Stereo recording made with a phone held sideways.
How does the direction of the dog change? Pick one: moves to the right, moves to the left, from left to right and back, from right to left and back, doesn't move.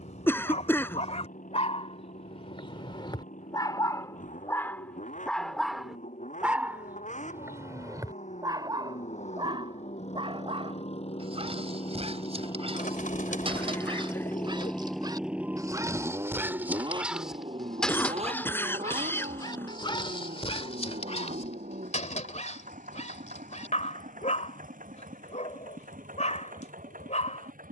from left to right and back.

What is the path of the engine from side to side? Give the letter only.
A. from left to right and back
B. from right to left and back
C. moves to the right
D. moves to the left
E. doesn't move
C.